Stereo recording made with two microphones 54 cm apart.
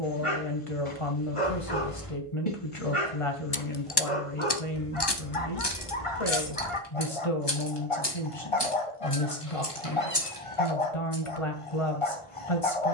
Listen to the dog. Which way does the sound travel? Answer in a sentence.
You can hear the dog stay put.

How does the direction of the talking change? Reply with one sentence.
You can hear the talking stay in one place.